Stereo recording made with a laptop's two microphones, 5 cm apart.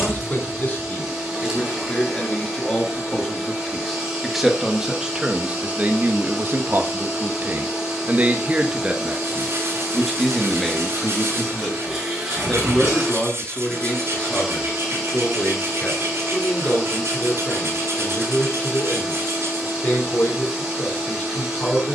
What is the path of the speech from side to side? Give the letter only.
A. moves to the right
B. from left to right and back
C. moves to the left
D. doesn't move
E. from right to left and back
B.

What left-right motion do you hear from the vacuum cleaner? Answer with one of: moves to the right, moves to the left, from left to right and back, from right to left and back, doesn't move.
doesn't move.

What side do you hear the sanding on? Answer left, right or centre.
right.